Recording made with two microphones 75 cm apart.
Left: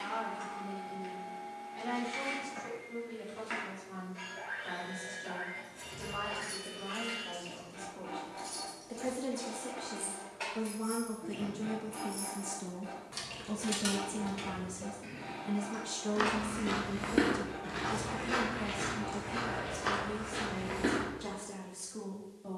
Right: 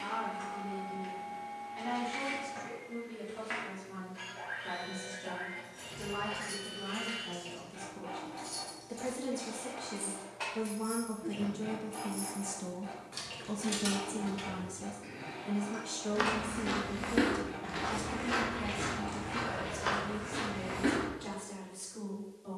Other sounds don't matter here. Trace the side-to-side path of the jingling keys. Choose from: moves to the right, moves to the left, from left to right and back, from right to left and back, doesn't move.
moves to the left.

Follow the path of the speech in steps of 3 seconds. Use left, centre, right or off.
right, right, right, right, centre, left, left, left.